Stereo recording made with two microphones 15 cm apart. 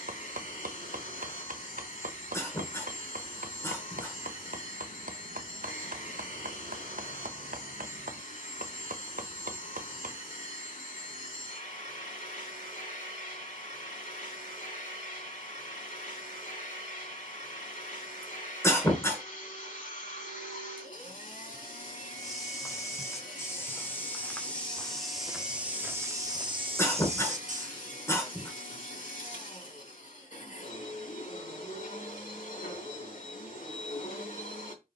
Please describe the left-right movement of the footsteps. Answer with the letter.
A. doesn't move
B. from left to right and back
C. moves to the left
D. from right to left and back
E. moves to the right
E.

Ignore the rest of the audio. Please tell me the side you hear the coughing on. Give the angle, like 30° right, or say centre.
20° left.